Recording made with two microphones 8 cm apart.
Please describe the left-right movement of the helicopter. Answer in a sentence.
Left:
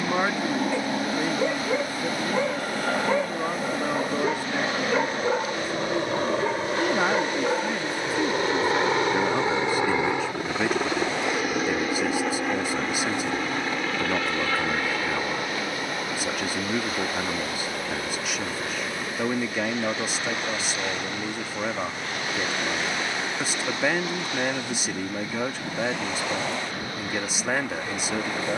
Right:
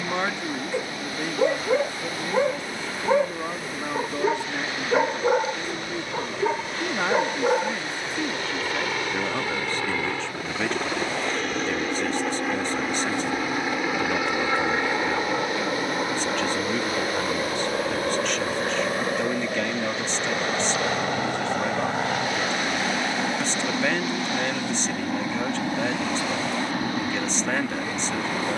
You can hear the helicopter travel towards the right.